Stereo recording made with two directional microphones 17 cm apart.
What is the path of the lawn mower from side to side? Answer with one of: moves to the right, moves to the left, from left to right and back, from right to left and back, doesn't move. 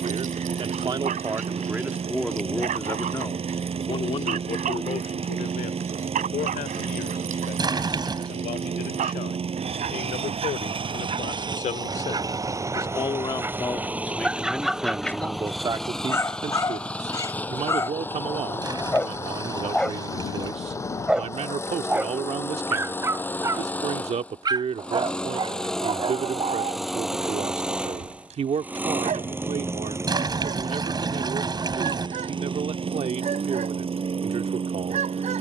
from right to left and back.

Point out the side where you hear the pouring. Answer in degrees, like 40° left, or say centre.
20° right.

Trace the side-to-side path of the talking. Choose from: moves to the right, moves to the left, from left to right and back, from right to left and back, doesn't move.
from right to left and back.